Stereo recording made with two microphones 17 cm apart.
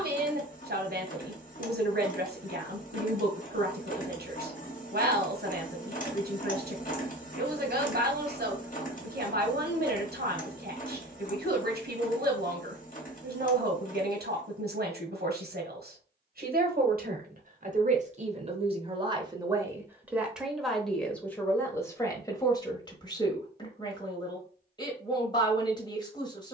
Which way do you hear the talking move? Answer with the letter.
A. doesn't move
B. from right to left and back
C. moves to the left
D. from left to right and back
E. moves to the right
C.